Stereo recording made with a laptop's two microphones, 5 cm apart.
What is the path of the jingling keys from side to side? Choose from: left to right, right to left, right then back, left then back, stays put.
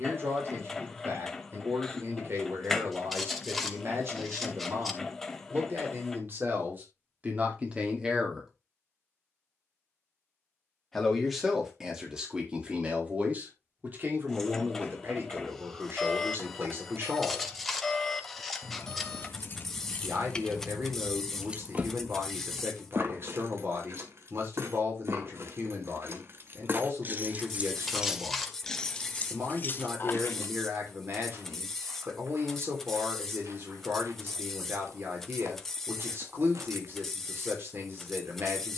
right then back.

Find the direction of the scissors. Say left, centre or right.
centre.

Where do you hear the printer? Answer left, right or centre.
centre.